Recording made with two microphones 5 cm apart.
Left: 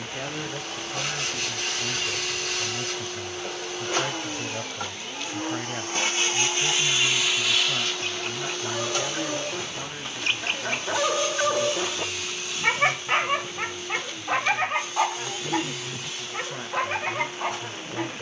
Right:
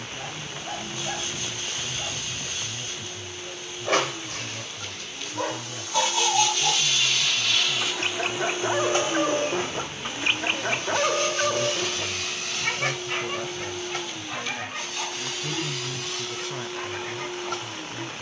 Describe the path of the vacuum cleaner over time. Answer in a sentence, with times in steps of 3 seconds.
You can hear the vacuum cleaner on the left from 0 s, in the centre from 6 s and on the right from 9 s.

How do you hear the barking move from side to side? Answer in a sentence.
You can hear the barking go from the right side to the left.